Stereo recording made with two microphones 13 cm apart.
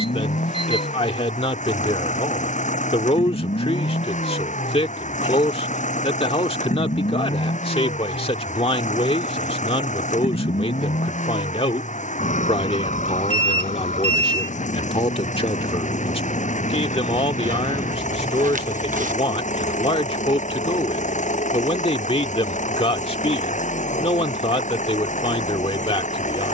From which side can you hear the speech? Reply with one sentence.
You can hear the speech on the left.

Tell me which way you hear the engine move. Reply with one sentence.
You can hear the engine stay in one place.